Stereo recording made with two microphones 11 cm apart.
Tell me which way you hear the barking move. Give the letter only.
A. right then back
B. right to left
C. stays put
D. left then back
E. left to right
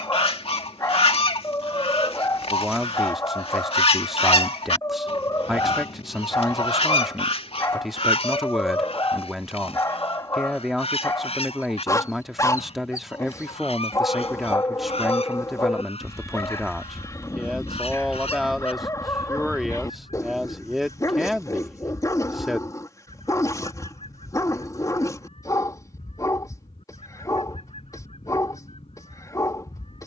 C.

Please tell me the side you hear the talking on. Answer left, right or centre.
centre.